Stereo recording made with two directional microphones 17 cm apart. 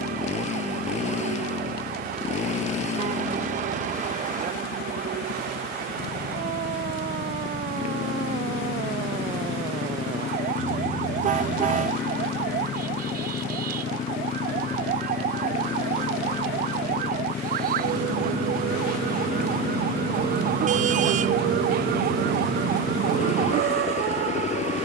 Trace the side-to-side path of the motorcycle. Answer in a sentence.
You can hear the motorcycle stay in one place.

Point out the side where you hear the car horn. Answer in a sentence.
In this clip you hear the car horn on the right.